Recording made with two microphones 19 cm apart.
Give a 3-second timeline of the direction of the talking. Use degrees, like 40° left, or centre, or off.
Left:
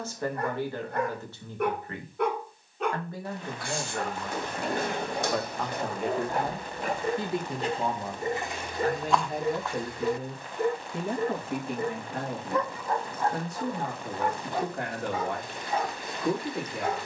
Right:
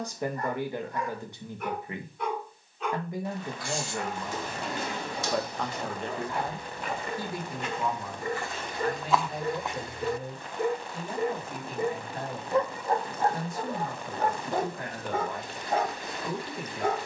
20° right, 10° right, 20° left, 60° left, 70° left, 70° left.